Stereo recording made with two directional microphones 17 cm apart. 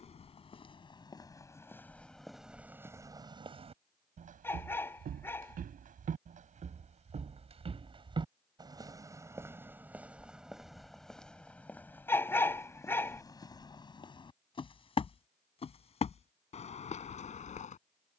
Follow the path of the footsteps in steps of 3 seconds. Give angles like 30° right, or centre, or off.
10° left, 40° right, 30° right, centre, 20° left, 40° left.